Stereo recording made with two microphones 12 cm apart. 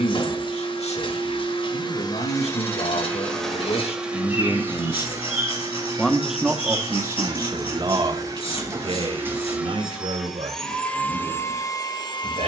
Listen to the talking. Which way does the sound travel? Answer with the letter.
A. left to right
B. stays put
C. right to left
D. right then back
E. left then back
A.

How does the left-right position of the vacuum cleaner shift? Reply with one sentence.
You can hear the vacuum cleaner go right and come back.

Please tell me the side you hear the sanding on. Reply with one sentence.
You can hear the sanding on the left.